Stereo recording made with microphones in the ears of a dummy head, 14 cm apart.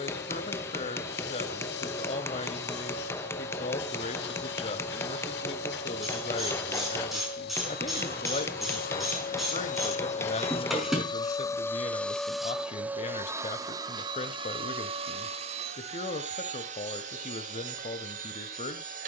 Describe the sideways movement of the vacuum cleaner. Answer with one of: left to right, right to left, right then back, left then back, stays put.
left to right.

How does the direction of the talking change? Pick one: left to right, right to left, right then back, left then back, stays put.
stays put.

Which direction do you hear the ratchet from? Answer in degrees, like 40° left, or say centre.
centre.